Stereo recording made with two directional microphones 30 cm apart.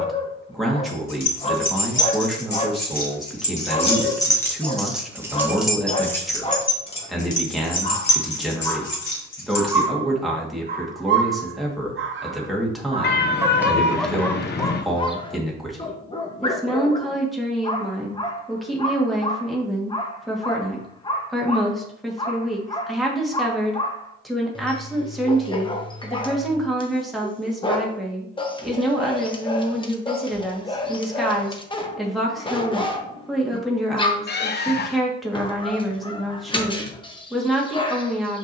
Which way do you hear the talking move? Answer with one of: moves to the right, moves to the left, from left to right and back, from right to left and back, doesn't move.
doesn't move.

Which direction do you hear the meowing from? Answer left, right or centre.
left.